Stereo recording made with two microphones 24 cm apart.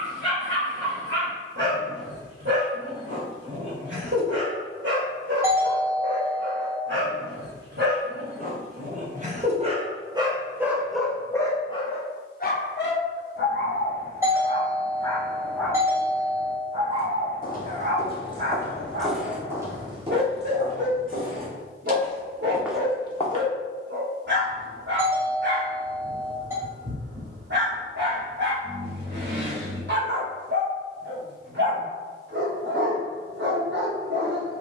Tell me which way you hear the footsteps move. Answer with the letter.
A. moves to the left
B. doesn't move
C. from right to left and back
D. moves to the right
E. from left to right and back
E.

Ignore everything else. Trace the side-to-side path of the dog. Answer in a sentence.
You can hear the dog go left and come back.